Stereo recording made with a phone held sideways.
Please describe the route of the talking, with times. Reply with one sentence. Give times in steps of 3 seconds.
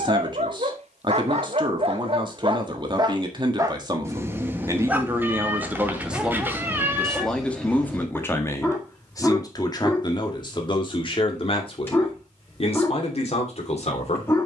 You can hear the talking on the right from 0 s, in the centre from 6 s and on the left from 9 s.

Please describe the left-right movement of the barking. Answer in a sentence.
In this clip you hear the barking travel towards the left.